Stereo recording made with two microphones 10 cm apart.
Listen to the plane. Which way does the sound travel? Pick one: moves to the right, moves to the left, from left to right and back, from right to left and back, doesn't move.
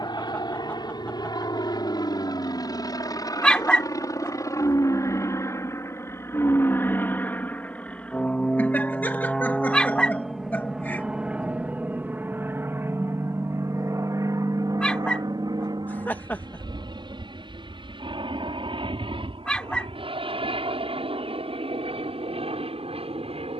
moves to the right.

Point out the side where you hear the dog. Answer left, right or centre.
centre.